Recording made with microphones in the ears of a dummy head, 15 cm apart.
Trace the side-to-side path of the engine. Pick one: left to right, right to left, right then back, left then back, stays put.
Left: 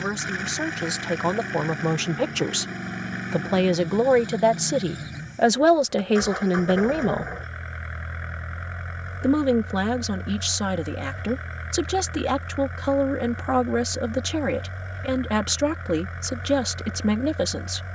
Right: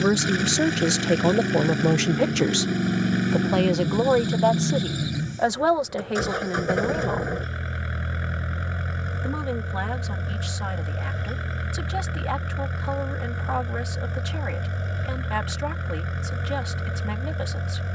stays put.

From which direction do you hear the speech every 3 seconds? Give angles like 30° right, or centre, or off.
30° right, 20° left, 40° left, 50° left, 50° left, 50° left.